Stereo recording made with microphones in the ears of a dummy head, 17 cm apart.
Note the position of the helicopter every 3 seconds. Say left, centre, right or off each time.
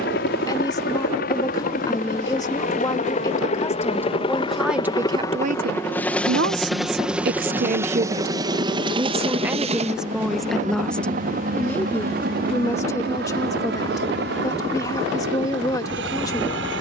left, left, centre, right, right, right.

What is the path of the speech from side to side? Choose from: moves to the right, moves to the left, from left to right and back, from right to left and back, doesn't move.
from left to right and back.